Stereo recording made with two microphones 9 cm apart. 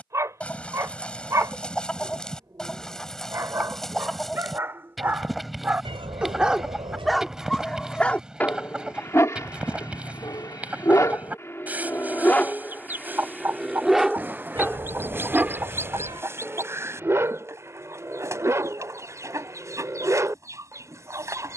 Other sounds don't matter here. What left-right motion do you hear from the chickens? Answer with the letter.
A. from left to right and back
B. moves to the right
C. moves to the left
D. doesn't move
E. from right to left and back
B.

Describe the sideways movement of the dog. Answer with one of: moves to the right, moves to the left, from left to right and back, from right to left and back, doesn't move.
from right to left and back.